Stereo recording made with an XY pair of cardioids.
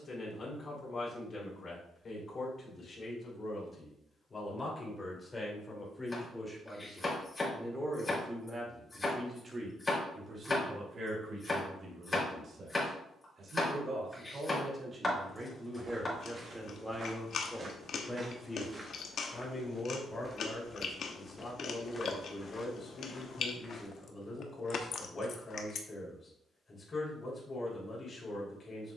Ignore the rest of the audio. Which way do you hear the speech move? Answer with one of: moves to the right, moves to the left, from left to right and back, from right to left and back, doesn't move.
from left to right and back.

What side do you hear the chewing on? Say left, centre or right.
left.